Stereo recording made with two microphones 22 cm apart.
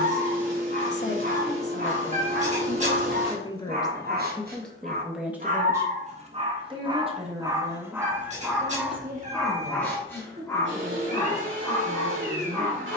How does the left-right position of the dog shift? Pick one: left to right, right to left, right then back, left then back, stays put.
right to left.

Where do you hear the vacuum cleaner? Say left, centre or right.
right.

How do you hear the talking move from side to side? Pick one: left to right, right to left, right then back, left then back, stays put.
left to right.